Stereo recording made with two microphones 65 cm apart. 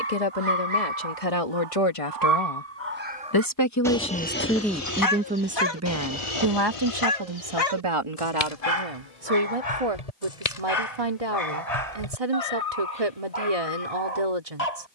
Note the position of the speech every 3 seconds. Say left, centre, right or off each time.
left, centre, right, right, right.